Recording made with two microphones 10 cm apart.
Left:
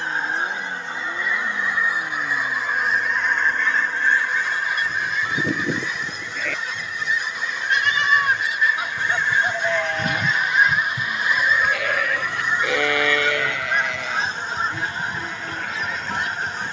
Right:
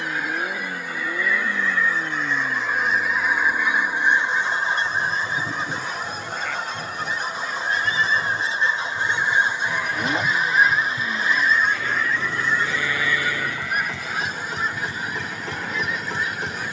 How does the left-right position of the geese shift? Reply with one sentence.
You can hear the geese go right and come back.